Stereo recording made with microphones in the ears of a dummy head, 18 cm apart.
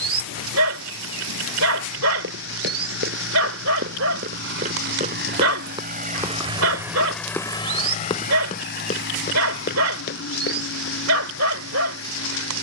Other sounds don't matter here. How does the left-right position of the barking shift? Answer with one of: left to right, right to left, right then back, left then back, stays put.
stays put.